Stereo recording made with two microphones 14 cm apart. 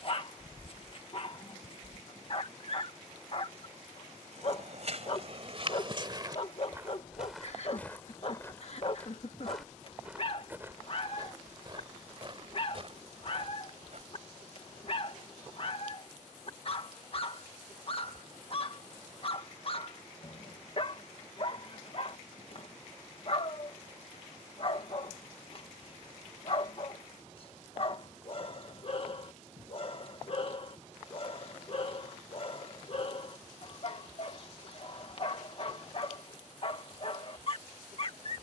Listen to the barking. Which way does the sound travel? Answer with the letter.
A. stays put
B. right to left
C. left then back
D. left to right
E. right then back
A.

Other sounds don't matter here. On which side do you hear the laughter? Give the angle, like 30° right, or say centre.
50° left.